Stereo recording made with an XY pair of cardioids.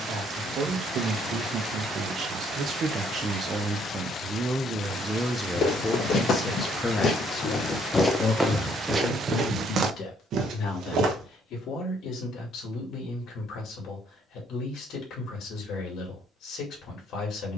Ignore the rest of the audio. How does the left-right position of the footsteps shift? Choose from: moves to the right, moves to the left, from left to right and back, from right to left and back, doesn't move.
moves to the right.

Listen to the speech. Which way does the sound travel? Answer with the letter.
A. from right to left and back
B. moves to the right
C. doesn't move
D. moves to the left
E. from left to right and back
D.